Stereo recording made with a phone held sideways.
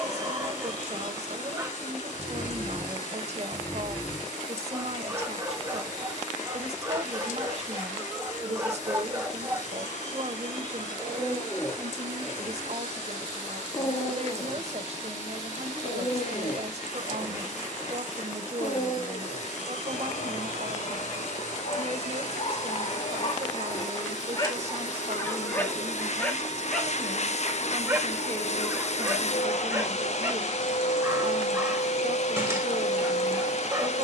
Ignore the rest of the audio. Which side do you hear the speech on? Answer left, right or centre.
right.